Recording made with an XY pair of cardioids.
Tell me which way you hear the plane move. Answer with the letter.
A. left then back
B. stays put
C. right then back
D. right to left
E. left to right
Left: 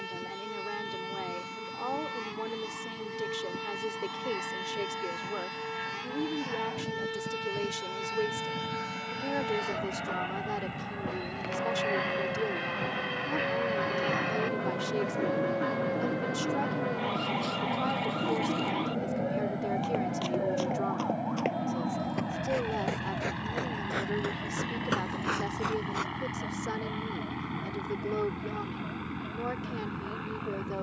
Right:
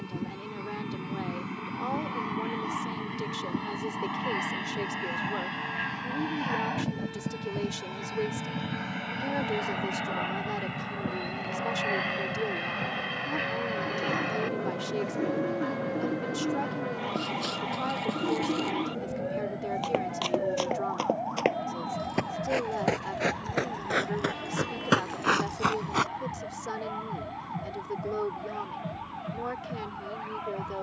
D.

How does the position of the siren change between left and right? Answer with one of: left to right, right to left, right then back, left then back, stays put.
left to right.